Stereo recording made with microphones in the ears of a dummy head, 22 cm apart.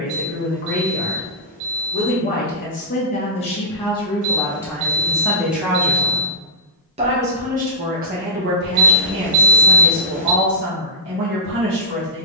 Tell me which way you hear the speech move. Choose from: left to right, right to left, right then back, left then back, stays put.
left to right.